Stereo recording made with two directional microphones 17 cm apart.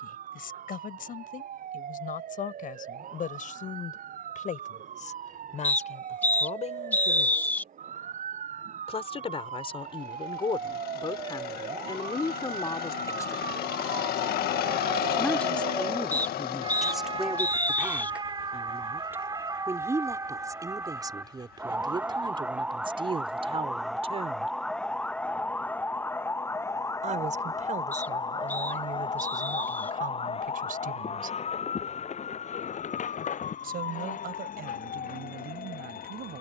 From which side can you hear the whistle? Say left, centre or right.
centre.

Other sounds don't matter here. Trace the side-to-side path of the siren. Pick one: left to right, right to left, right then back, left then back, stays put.
right to left.